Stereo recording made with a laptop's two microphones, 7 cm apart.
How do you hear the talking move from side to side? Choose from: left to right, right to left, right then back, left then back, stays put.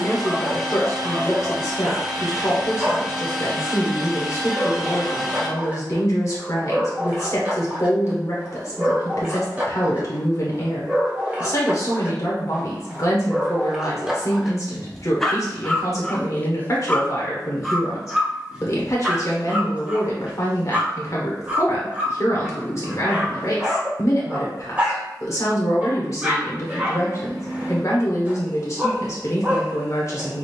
stays put.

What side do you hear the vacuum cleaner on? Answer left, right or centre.
centre.